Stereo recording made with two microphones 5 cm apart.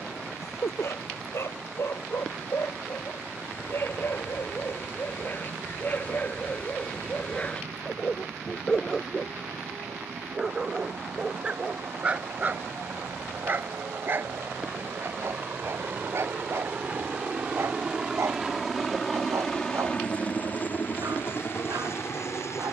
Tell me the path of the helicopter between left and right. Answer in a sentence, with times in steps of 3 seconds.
In this clip you hear the helicopter on the right from 0 s, in the centre from 18 s and on the left from 21 s.